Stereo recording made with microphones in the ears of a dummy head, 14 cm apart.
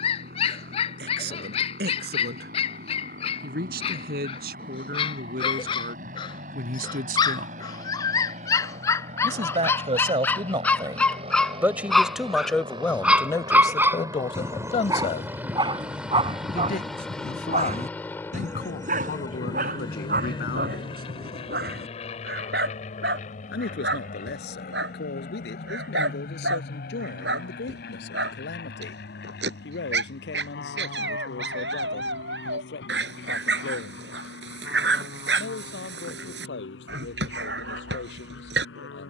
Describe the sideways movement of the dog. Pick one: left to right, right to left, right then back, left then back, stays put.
left to right.